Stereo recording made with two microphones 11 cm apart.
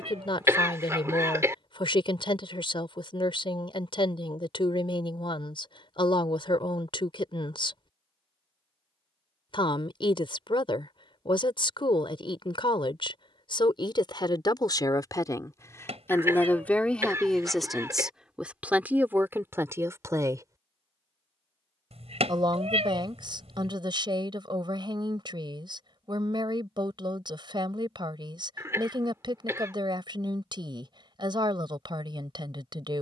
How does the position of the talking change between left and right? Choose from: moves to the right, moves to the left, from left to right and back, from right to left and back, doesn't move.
moves to the right.